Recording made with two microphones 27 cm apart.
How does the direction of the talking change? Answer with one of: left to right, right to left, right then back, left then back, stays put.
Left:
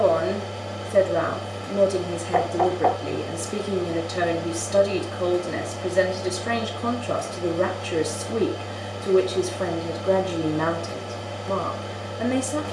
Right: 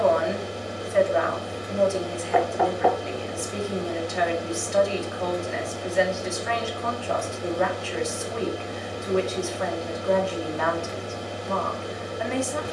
stays put.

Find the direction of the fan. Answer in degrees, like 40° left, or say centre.
20° right.